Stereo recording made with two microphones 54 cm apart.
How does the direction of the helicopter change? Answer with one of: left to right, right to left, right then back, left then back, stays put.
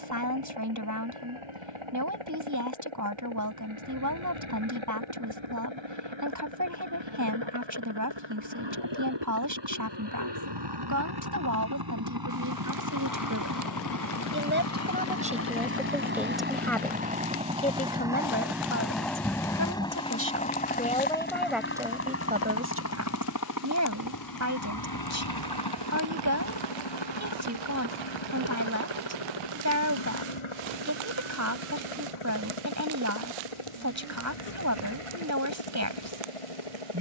right to left.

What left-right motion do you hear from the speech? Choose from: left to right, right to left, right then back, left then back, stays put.
left then back.